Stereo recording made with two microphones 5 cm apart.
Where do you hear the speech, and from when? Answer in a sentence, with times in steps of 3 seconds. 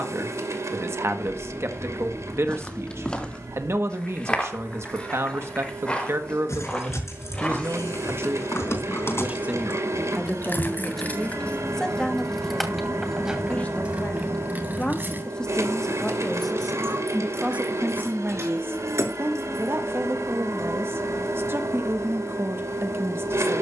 In this clip you hear the speech on the right from 0 s, in the centre from 9 s, on the left from 12 s, in the centre from 15 s and on the right from 18 s.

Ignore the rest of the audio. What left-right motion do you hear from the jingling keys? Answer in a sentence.
In this clip you hear the jingling keys move to the right.